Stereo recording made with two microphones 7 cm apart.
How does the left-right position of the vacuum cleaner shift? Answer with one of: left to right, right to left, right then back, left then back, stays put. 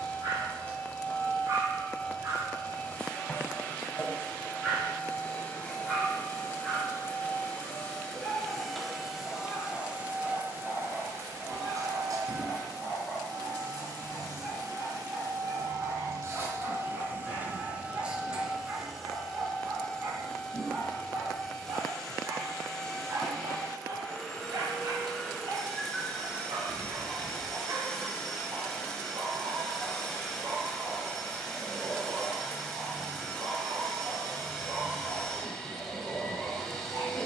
right then back.